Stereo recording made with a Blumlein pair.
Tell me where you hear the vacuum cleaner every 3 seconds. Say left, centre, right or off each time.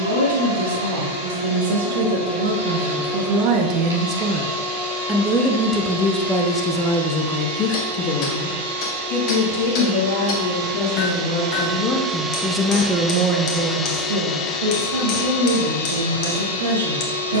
right, right, right, right, centre, left.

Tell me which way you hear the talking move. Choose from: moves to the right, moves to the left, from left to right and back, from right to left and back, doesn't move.
from right to left and back.